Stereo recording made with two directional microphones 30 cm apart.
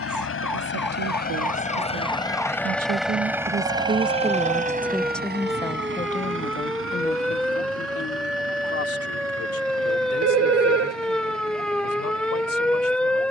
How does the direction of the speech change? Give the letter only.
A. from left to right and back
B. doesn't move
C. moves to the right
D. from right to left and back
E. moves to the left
E.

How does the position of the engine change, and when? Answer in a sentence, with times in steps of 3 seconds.
In this clip you hear the engine on the left from 0 s and on the right from 3 s.